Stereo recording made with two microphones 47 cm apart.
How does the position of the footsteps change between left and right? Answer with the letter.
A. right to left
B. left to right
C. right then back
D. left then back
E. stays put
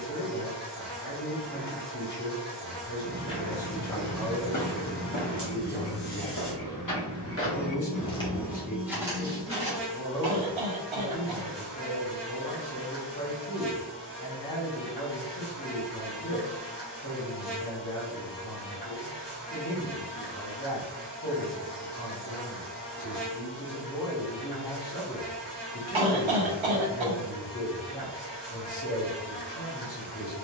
D.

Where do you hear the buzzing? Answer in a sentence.
In this clip you hear the buzzing on the left.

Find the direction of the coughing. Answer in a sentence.
You can hear the coughing on the right.